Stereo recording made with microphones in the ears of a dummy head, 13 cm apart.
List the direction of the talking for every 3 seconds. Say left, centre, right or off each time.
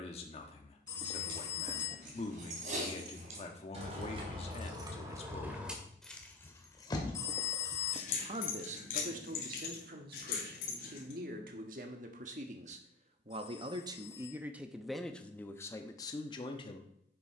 left, left, right, right, right, left.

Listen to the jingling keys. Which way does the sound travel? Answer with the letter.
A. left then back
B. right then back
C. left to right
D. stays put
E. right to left
E.